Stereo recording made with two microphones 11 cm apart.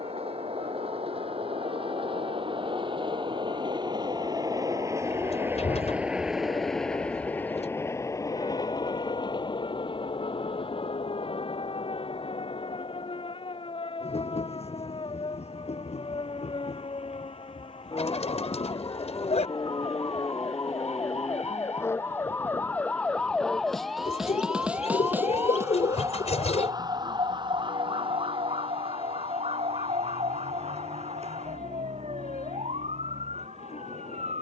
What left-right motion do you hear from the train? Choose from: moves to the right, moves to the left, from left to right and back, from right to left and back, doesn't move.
moves to the left.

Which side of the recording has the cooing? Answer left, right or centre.
left.